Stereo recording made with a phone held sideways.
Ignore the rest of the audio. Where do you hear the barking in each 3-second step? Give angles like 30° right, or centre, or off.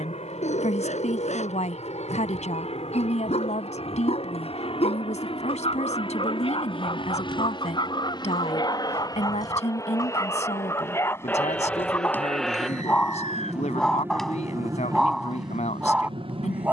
50° left, 40° left, 30° left, 20° left, 10° left, 10° right.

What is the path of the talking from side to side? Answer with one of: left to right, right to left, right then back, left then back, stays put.
stays put.